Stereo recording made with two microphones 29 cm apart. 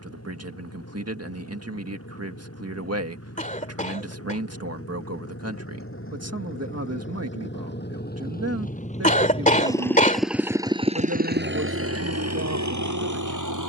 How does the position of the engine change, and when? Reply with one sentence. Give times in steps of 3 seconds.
In this clip you hear the engine on the left from 0 s, in the centre from 9 s and on the right from 12 s.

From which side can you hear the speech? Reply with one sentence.
You can hear the speech on the right.